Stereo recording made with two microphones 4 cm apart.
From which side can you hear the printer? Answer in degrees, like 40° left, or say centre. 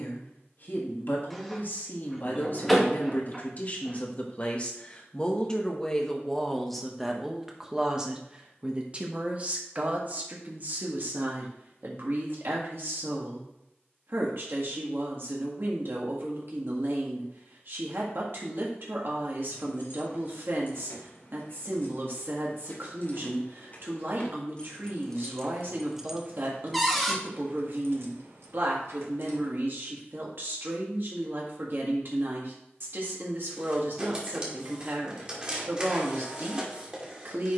20° right.